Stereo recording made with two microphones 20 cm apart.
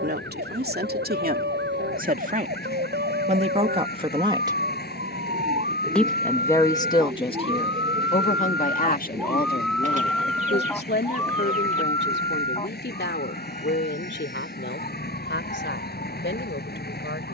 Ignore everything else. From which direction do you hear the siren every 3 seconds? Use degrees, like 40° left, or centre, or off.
70° right, 50° right, 30° right, 10° left, 30° left, 50° left.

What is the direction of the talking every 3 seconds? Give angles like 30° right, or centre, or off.
50° right, 30° right, 30° left, 60° left, 70° left, 70° left.